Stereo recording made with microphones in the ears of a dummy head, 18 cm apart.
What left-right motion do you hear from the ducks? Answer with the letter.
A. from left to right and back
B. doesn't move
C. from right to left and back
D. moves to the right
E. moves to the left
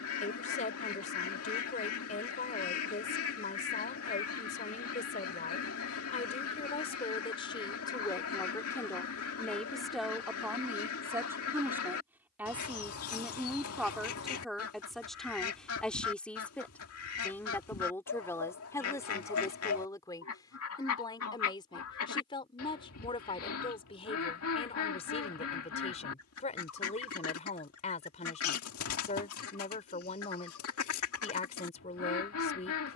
B.